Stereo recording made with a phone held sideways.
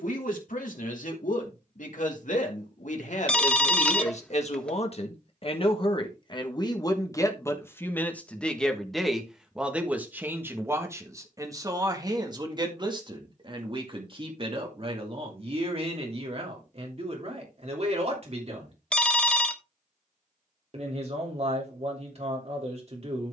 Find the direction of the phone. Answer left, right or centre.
centre.